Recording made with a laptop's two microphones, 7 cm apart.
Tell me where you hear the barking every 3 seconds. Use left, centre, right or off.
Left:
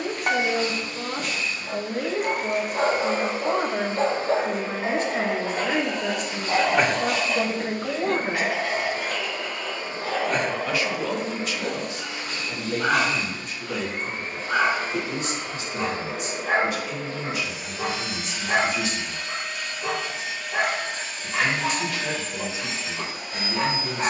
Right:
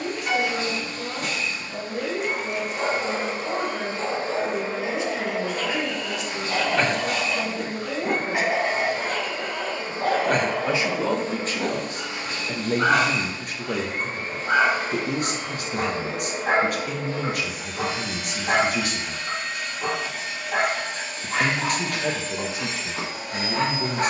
left, left, centre, right, right, right, right, right.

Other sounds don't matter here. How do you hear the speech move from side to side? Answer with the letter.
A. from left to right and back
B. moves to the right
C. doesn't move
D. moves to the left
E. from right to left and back
B.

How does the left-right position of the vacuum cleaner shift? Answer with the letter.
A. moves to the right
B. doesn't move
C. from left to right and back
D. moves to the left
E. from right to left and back
B.